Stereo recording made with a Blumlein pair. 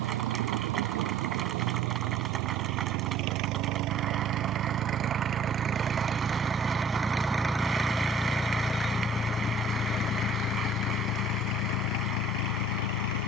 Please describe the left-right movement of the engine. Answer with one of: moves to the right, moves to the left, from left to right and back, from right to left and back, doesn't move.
moves to the left.